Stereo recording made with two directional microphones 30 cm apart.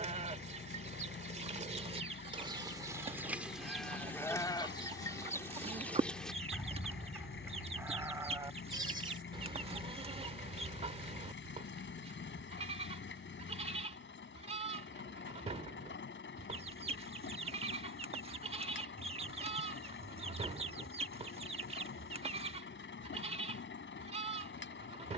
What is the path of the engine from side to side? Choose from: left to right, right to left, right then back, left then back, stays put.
stays put.